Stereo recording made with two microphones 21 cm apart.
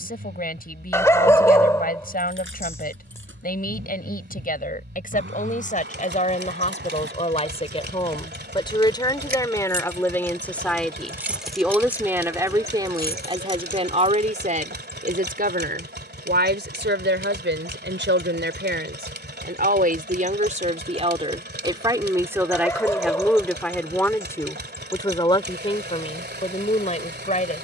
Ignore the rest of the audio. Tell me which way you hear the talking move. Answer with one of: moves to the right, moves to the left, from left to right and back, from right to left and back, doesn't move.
from left to right and back.